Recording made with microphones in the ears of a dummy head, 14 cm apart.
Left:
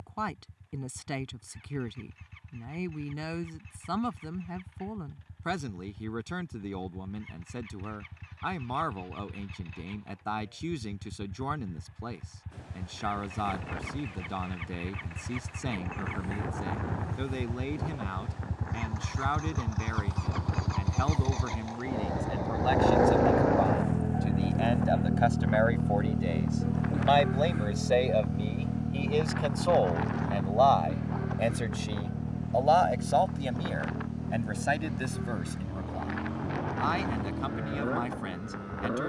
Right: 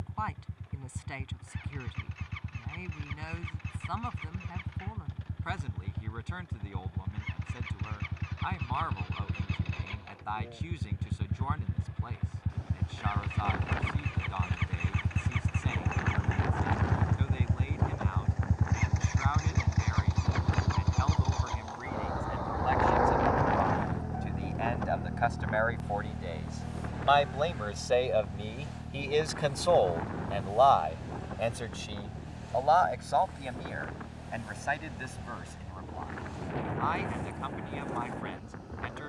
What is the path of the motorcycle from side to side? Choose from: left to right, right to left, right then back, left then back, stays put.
right to left.